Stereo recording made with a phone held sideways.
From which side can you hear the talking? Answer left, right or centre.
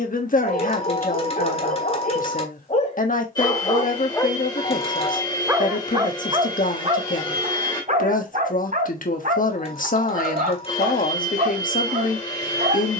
left.